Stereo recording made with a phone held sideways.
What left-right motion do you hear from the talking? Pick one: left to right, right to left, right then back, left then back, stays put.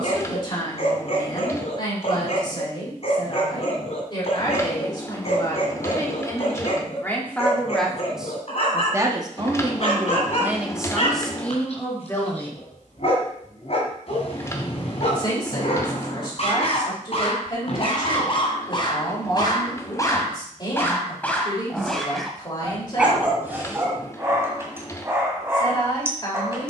right then back.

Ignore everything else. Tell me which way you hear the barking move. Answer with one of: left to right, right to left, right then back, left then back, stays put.
left to right.